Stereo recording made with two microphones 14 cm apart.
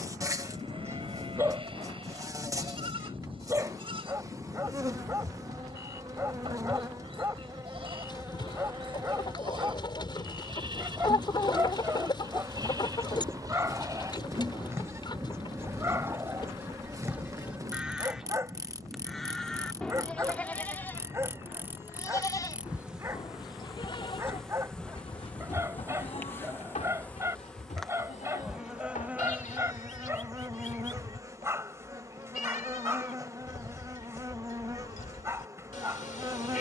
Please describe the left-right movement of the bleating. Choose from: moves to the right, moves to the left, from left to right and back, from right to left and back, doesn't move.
moves to the left.